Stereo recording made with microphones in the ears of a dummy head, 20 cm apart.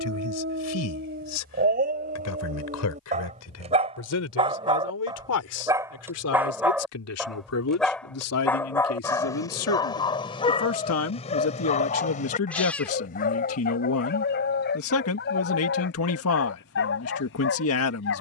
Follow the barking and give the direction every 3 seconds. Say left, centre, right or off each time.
right, right, centre, left, left, left.